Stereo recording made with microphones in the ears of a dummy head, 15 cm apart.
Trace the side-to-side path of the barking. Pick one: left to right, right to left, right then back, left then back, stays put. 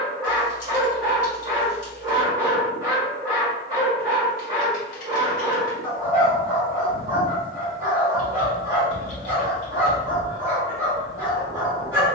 stays put.